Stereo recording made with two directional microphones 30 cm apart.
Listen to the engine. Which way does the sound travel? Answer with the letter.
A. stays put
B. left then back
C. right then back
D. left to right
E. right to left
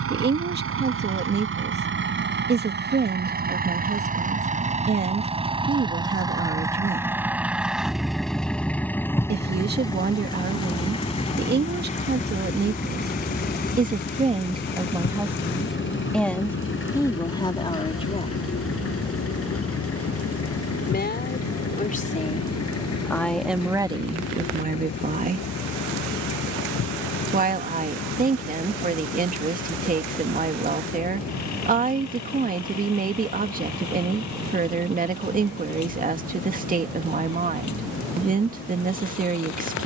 E.